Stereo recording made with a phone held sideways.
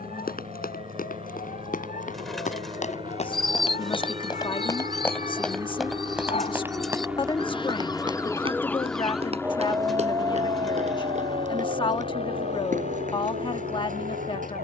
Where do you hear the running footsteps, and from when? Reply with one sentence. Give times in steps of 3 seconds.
In this clip you hear the running footsteps on the left from 0 s and on the right from 6 s.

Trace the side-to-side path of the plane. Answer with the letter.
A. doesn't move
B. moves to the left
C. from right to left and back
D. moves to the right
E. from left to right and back
B.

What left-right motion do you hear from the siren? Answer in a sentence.
In this clip you hear the siren go from the left side to the right.